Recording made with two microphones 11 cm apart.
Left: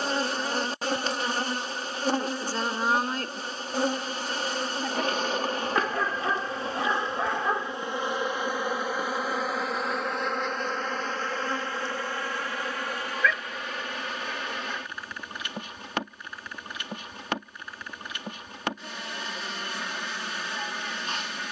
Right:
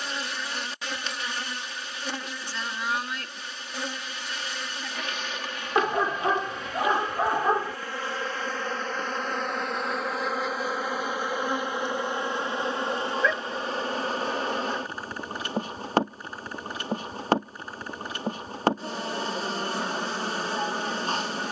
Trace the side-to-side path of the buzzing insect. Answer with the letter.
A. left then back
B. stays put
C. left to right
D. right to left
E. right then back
C.